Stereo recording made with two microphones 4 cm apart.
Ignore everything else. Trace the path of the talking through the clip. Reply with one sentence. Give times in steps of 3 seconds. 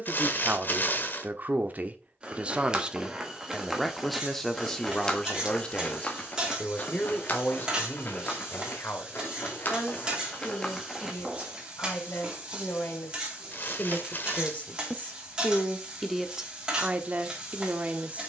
In this clip you hear the talking on the right from 0 s, in the centre from 3 s, on the left from 6 s and in the centre from 15 s.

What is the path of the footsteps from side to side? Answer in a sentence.
You can hear the footsteps move from right to left and back again.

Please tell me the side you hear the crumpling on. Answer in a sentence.
You can hear the crumpling on the left.